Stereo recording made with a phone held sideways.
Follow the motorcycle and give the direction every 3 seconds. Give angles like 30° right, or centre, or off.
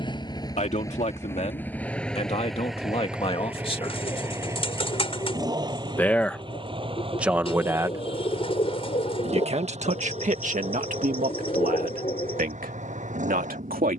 10° left, 20° right, 40° right, 50° right, 50° right.